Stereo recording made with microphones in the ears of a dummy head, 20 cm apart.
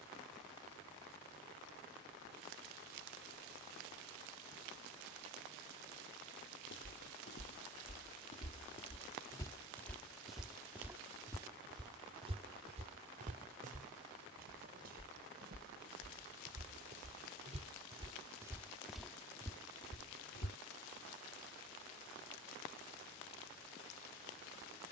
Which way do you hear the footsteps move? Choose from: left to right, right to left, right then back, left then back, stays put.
right then back.